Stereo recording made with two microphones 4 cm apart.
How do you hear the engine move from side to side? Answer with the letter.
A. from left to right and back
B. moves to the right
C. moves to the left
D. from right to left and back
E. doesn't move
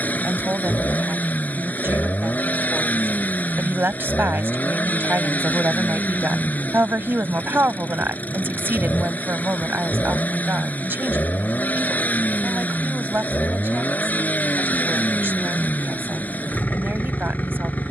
E.